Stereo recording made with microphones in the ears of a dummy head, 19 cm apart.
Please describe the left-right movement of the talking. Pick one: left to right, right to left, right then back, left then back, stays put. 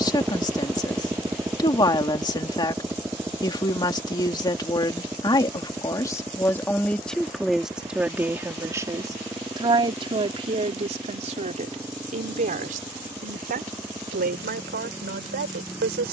left to right.